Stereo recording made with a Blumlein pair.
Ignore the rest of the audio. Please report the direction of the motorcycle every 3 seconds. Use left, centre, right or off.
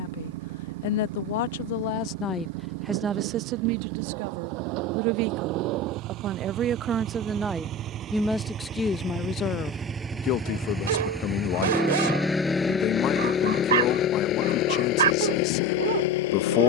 right, right, right, centre, left, left.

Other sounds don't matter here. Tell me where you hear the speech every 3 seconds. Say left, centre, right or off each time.
left, right, centre, left, left, left.